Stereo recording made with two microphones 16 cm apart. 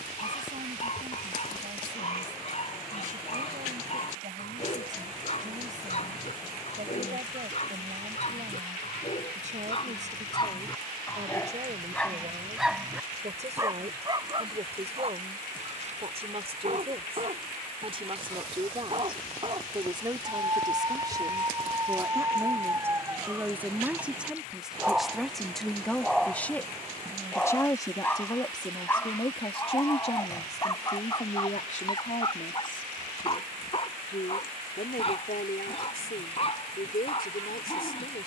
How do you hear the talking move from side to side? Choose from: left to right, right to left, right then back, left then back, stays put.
right to left.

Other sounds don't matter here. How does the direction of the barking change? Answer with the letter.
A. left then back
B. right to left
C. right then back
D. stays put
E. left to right
C.